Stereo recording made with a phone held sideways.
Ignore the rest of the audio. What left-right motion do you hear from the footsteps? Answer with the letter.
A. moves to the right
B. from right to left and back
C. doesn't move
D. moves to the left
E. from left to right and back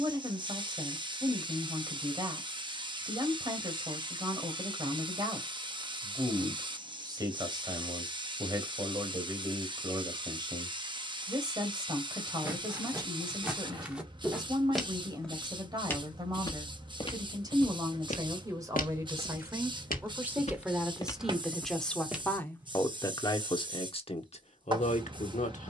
B.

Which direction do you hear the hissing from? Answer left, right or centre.
right.